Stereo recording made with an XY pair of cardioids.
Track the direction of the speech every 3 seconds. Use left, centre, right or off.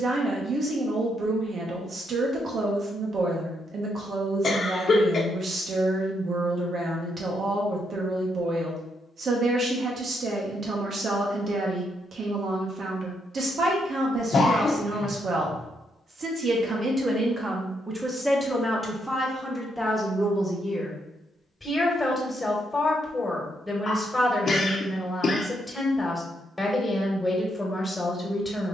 right, right, right, right, right, right, centre, centre, centre, centre.